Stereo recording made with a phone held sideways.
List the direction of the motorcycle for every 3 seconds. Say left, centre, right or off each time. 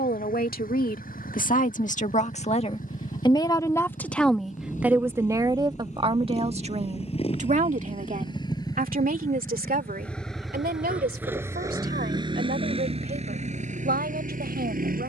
left, left, left, centre, right.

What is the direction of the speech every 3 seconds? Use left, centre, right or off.
left, centre, right, right, right.